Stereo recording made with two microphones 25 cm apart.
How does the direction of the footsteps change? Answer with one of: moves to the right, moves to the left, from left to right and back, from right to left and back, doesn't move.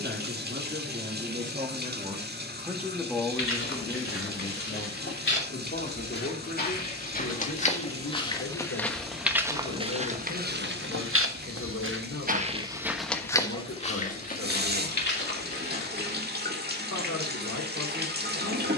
from left to right and back.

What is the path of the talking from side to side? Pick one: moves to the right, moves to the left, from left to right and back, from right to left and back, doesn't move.
moves to the left.